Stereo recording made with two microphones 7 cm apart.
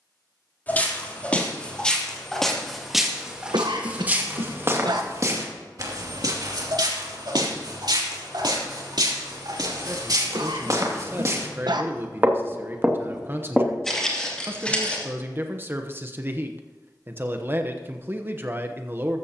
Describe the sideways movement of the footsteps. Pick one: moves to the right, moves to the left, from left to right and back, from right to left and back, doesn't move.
from left to right and back.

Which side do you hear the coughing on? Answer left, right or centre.
right.